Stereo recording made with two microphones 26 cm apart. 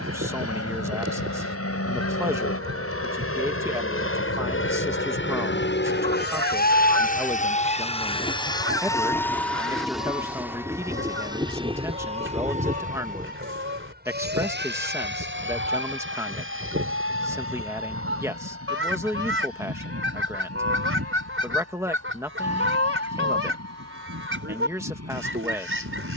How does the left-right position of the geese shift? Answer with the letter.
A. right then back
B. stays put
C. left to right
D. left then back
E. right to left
B.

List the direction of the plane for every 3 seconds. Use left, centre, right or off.
left, left, left, centre, right, right, right, right, right.